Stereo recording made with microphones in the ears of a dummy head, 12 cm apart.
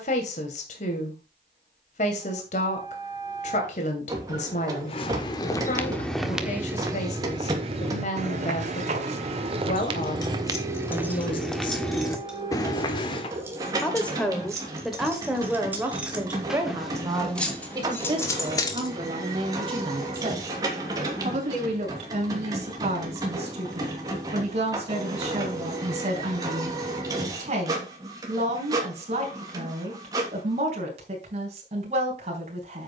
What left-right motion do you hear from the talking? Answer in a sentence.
In this clip you hear the talking move from left to right.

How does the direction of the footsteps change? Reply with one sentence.
In this clip you hear the footsteps go right and come back.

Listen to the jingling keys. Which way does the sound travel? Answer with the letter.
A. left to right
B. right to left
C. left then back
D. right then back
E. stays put
D.